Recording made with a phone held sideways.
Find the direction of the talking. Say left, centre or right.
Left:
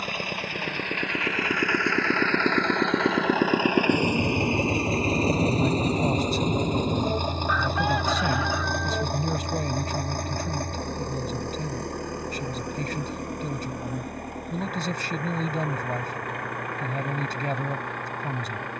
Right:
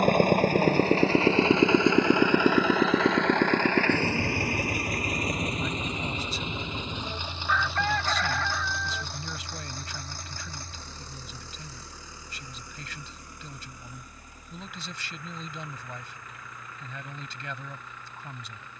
left.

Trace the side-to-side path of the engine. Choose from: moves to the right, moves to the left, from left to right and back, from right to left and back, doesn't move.
moves to the left.